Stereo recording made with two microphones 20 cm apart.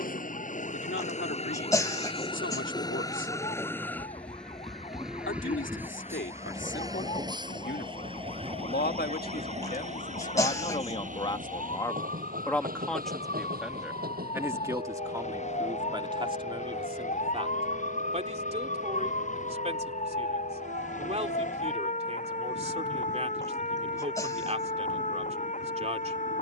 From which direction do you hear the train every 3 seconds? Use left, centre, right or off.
left, centre, right, right, right, right, right, right, right.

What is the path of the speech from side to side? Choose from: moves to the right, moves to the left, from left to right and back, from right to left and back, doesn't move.
moves to the right.